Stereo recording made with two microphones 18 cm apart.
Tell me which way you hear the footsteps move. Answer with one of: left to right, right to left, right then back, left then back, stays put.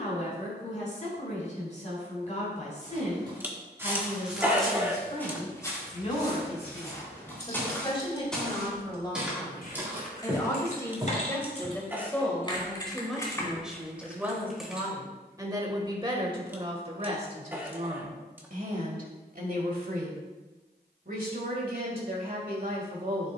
left then back.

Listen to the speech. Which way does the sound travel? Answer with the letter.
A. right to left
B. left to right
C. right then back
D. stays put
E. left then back
B.